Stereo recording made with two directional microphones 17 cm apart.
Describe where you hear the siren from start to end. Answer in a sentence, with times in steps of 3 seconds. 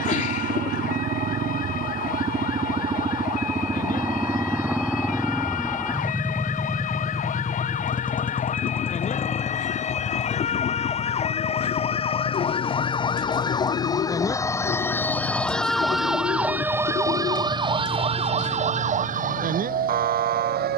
You can hear the siren on the left from 0 s, in the centre from 15 s and on the right from 18 s.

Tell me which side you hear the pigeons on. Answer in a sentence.
In this clip you hear the pigeons on the left.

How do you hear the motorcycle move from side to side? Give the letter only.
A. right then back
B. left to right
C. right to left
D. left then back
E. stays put
C.